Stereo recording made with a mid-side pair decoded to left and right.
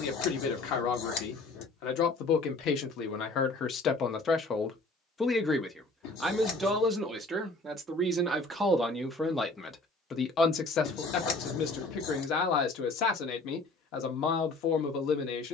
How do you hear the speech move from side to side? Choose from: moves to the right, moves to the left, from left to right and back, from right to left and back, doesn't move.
from left to right and back.